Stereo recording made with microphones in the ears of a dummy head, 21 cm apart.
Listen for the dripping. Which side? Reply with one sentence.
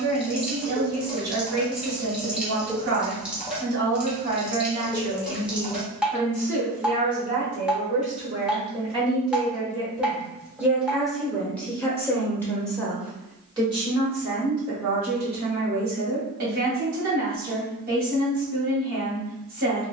You can hear the dripping in the centre.